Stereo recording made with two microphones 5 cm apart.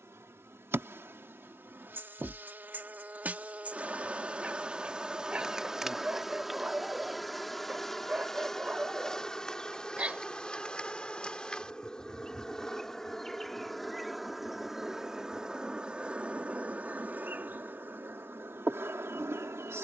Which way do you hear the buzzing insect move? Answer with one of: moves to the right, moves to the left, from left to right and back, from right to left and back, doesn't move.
from right to left and back.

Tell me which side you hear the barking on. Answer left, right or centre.
right.